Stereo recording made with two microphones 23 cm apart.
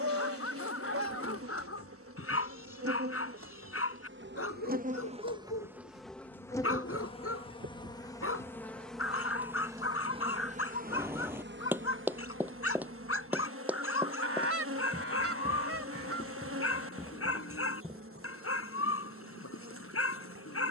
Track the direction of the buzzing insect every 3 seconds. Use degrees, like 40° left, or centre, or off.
80° right, 40° right, 10° left, 30° right, 70° right, 70° right, 70° right.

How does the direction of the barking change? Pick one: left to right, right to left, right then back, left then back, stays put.
stays put.